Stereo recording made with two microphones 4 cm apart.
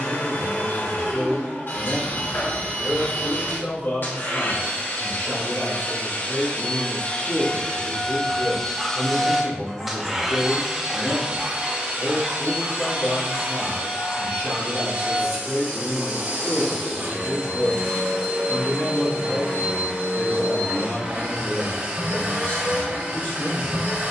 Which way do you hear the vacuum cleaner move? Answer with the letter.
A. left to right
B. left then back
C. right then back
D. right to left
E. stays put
A.